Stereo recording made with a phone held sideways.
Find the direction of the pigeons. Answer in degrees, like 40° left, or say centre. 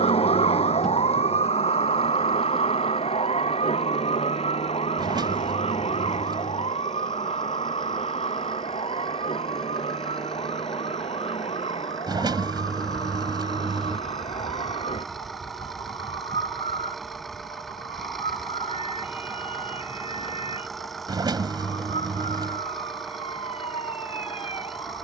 30° right.